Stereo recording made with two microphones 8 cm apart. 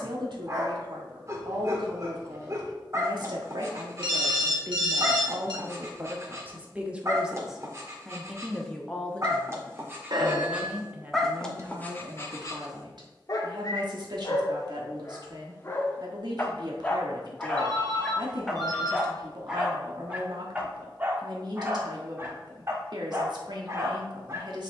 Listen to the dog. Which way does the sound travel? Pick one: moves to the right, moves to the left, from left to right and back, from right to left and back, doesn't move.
from right to left and back.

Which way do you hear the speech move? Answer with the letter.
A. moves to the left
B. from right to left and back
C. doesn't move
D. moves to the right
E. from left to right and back
B.